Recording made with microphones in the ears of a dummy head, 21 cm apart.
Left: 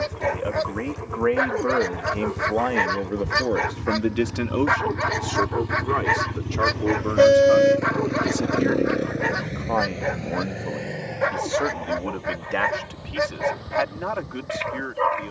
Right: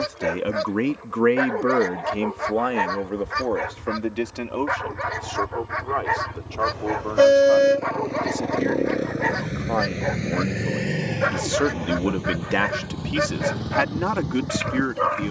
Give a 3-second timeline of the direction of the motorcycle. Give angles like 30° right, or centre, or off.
70° left, 60° left, 30° left, 40° right, 70° right.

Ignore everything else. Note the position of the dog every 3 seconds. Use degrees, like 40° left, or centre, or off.
10° left, 60° left, 30° left, centre, 10° right.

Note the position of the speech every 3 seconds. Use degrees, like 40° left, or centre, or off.
30° right, 20° left, 20° left, 20° right, 60° right.